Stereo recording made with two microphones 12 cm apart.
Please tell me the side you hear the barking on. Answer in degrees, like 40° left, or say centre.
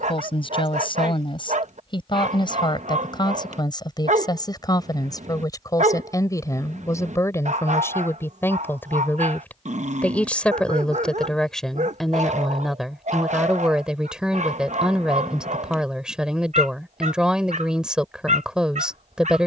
70° right.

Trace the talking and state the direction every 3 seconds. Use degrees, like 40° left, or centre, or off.
40° left, 30° left, 20° left, 10° left, centre, 10° right, 10° right.